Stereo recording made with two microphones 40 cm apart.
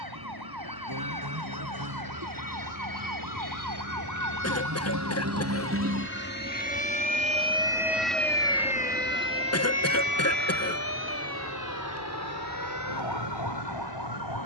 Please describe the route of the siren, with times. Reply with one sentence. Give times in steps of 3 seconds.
You can hear the siren on the right from 0 s, in the centre from 6 s and on the left from 9 s.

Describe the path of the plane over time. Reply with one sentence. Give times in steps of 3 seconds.
You can hear the plane on the left from 0 s, in the centre from 6 s and on the right from 9 s.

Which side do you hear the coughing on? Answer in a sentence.
In this clip you hear the coughing on the left.